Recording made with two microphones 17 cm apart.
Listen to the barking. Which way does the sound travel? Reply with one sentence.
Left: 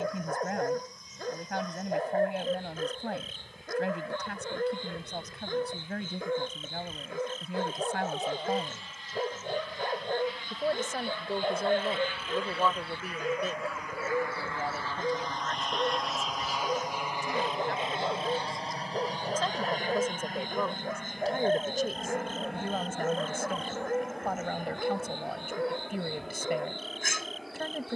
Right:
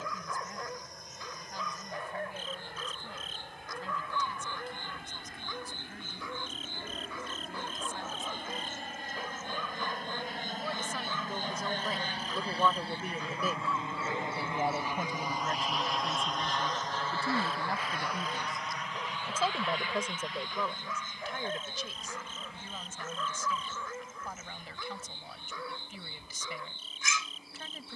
You can hear the barking stay in one place.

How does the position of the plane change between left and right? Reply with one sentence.
In this clip you hear the plane go from the right side to the left.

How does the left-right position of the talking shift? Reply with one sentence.
In this clip you hear the talking go right and come back.